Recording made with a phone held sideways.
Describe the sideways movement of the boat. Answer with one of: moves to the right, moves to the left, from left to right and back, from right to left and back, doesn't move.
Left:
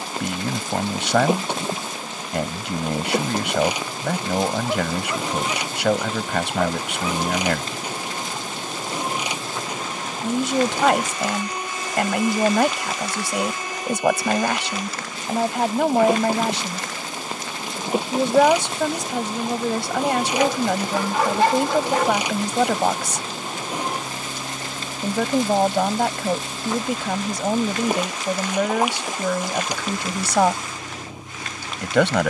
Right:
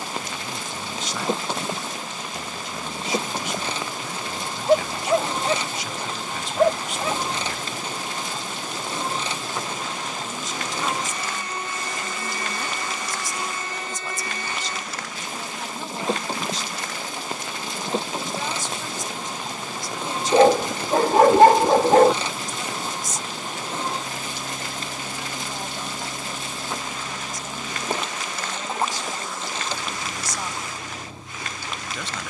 doesn't move.